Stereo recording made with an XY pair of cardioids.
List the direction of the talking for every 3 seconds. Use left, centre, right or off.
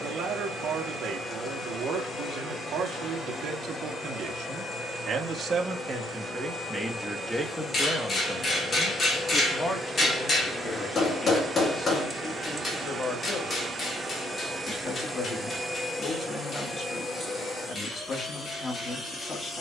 right, right, centre, left, left, left, left.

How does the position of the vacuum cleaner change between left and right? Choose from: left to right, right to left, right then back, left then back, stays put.
right then back.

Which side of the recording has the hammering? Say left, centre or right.
left.